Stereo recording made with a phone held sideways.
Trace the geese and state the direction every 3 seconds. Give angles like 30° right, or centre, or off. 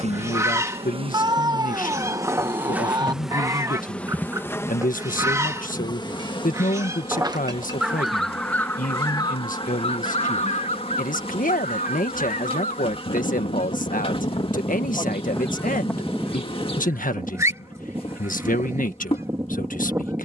20° right, 20° right, 10° right, 50° left, 50° left, centre, 20° right.